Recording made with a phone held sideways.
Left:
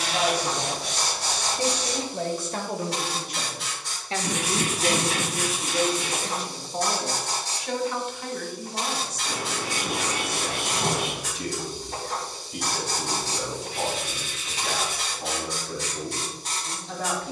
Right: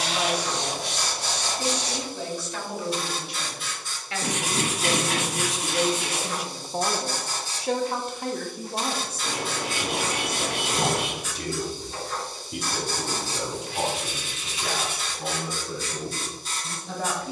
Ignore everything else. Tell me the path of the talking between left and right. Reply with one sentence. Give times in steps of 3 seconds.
In this clip you hear the talking on the left from 0 s and on the right from 6 s.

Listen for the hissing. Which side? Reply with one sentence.
You can hear the hissing on the left.